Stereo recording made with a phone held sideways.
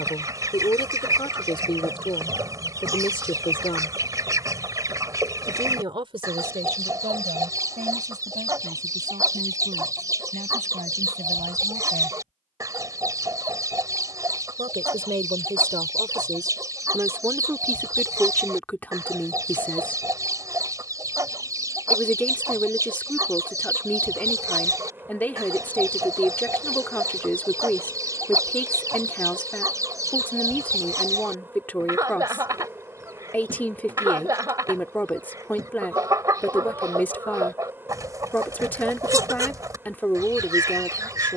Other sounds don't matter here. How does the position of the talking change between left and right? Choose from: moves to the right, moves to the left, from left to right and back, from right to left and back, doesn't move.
from left to right and back.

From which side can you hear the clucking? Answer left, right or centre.
right.